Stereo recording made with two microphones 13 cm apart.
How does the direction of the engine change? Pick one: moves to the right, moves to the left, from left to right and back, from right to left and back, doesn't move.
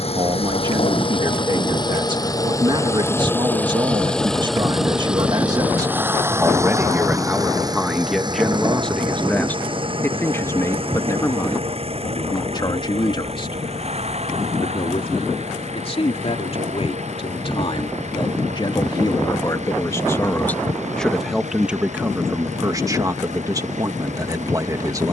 moves to the right.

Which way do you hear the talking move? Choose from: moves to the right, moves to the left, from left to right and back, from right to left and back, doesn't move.
from right to left and back.